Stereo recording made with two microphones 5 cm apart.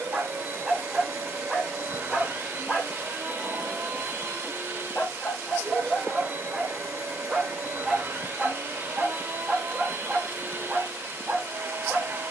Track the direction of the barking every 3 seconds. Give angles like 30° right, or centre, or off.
centre, 20° left, 10° right, 20° right.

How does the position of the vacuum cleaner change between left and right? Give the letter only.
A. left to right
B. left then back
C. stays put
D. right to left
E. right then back
C.